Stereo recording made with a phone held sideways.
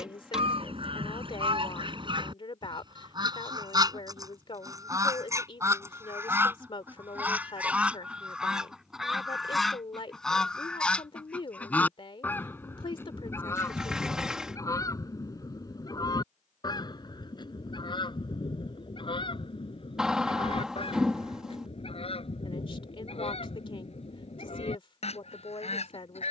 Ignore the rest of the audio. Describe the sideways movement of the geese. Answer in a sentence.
In this clip you hear the geese go from the right side to the left.